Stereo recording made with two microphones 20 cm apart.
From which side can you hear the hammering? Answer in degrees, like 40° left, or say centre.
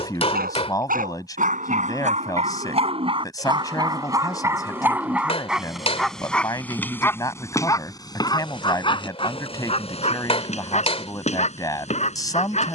30° left.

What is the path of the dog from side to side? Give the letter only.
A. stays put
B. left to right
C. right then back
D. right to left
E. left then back
D.